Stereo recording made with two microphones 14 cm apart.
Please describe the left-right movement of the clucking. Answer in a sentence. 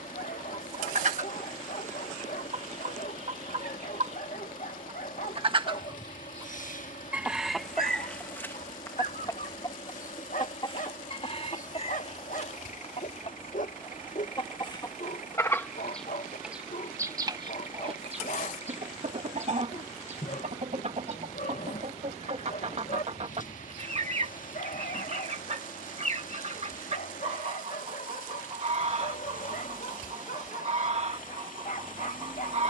In this clip you hear the clucking move from right to left and back again.